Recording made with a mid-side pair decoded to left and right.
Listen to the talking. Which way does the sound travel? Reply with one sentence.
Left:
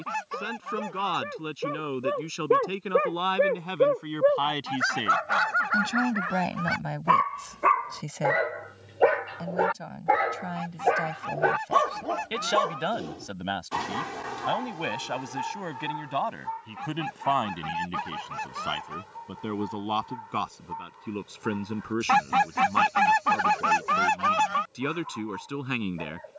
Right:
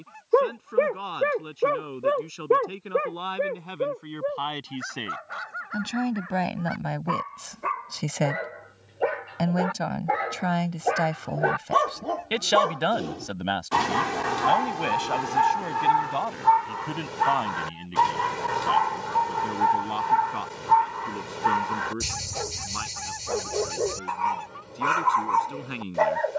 You can hear the talking go right and come back.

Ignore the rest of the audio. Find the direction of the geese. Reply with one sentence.
In this clip you hear the geese on the left.